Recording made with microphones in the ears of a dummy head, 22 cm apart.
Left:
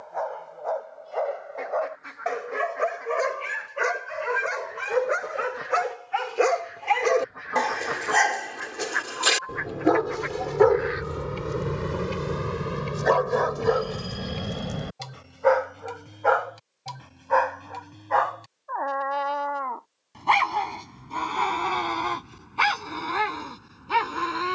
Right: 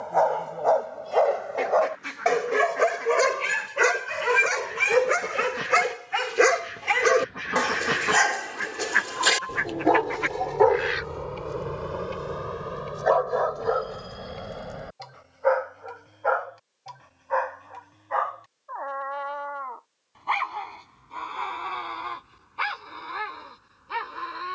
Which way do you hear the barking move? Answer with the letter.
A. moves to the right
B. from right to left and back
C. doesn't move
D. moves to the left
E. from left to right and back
D.